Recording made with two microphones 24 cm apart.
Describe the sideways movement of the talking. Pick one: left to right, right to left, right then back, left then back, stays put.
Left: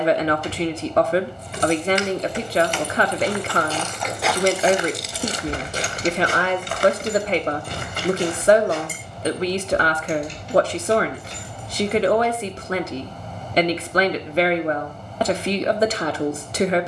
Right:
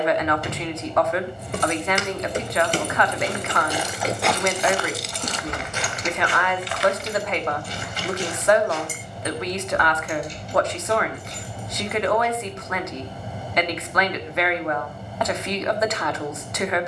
stays put.